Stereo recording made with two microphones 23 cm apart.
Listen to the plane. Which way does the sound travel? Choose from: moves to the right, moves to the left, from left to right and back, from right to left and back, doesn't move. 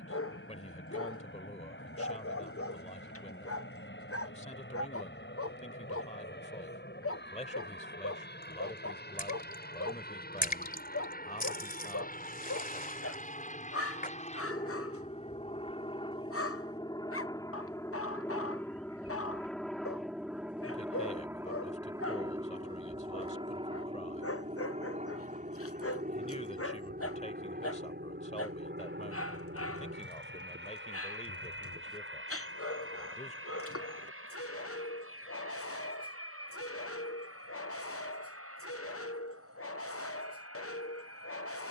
moves to the right.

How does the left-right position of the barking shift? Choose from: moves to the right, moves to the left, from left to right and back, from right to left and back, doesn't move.
doesn't move.